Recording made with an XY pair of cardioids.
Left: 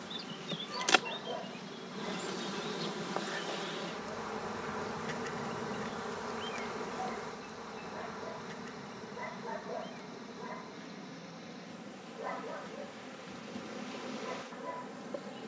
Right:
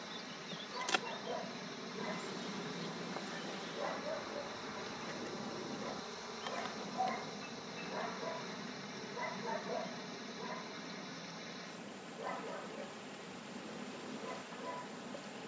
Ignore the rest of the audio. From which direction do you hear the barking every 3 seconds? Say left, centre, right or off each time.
centre, right, right, centre, left.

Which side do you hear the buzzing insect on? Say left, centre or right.
left.